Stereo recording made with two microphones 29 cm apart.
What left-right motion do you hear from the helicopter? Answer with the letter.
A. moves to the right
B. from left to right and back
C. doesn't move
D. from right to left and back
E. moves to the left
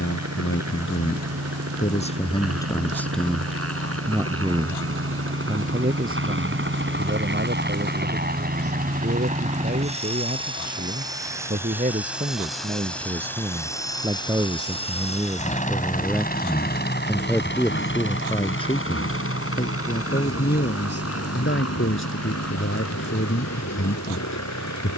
E.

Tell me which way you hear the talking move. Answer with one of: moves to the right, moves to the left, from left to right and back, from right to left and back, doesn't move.
from left to right and back.